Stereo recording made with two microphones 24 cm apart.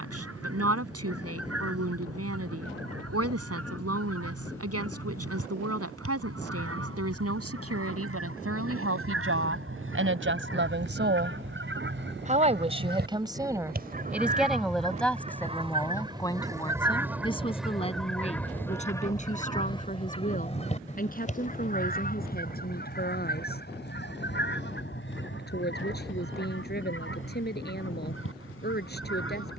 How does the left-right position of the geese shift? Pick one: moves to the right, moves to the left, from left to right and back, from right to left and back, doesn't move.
moves to the left.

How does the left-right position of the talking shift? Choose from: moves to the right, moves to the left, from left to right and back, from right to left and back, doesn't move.
moves to the left.